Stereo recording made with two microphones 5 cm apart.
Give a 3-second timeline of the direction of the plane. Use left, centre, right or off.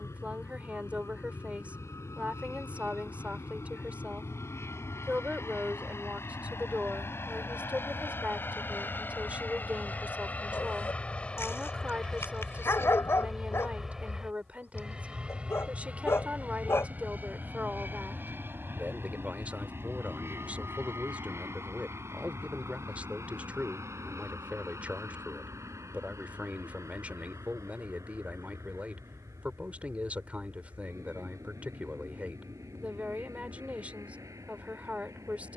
left, left, left, left, centre, right, right, right, right, right, right, right.